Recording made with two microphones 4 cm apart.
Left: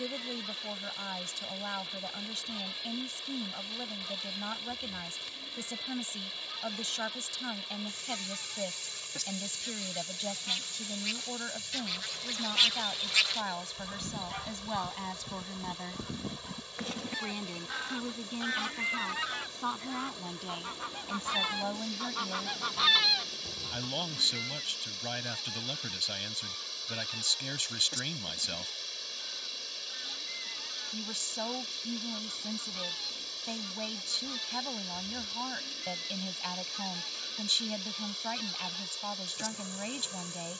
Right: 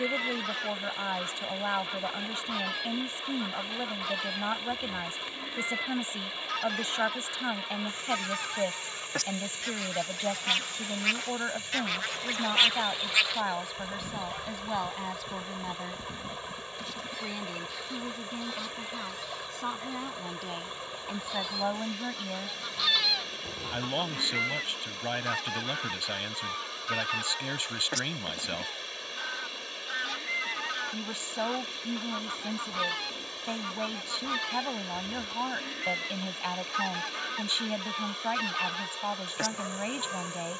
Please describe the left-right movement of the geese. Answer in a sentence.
In this clip you hear the geese go left and come back.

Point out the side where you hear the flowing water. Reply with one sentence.
You can hear the flowing water on the right.